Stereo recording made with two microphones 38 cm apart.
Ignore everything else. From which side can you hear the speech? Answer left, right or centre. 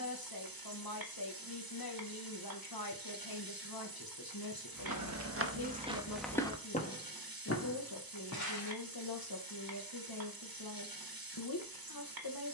left.